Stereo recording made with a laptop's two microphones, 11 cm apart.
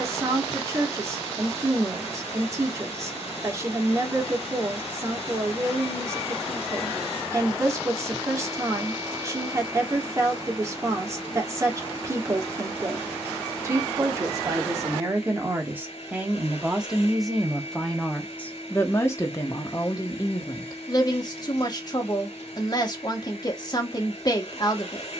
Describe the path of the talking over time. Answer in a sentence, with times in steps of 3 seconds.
In this clip you hear the talking on the right from 0 s, in the centre from 15 s and on the left from 18 s.